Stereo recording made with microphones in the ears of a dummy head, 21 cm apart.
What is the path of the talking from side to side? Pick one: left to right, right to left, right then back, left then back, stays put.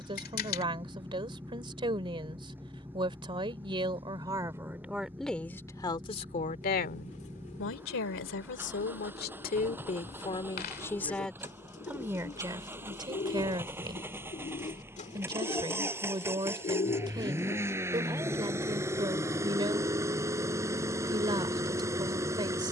left then back.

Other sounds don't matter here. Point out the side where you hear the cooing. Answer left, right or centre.
left.